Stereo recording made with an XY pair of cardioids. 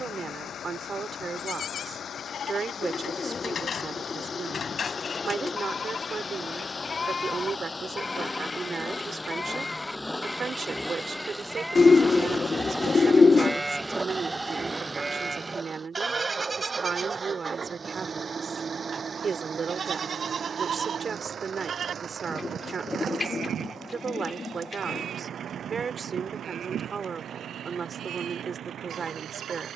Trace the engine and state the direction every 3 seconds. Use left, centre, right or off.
left, left, left, centre, centre, right, right, right, right, right.